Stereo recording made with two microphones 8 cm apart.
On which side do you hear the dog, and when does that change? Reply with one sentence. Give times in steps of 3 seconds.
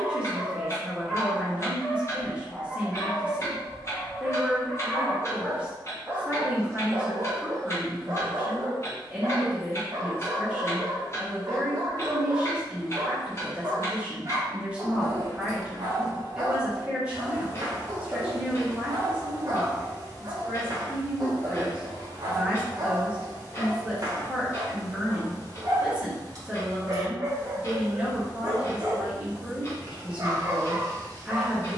You can hear the dog in the centre from 0 s and on the right from 6 s.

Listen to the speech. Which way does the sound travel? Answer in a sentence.
You can hear the speech stay put.